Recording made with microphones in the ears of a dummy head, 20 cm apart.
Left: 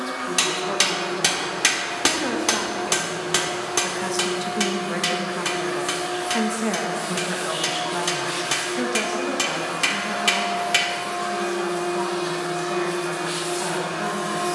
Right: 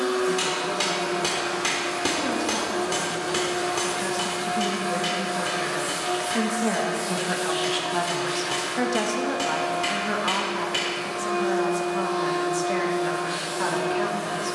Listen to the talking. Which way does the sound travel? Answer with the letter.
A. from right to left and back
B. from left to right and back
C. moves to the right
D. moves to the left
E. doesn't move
C.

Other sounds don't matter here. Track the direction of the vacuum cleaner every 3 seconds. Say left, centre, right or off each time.
right, right, centre, left, left.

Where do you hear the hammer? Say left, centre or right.
left.